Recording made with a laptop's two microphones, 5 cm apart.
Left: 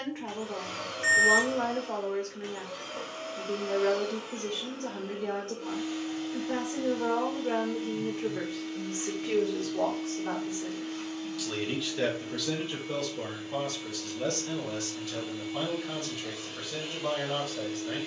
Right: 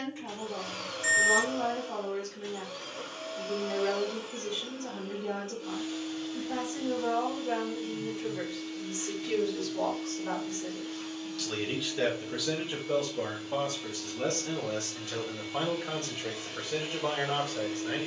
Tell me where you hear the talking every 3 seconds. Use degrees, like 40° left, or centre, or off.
60° left, 60° left, 50° left, 20° left, 20° right, 30° right.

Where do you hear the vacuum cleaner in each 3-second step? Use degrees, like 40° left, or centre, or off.
50° left, 50° left, 50° left, 50° left, 30° left, centre.